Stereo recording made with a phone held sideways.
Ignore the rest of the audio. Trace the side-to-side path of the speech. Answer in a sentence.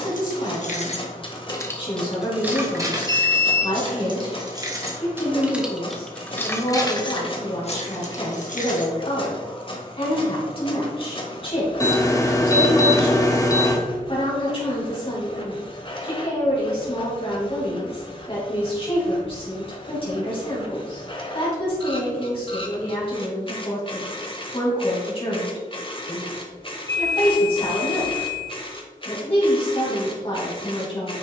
You can hear the speech stay in one place.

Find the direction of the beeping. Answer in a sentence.
You can hear the beeping on the left.